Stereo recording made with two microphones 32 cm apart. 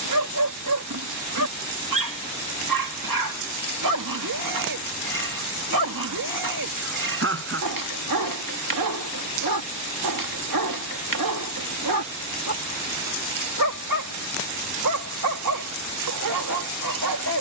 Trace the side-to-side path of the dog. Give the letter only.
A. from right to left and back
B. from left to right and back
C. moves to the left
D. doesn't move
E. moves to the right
D.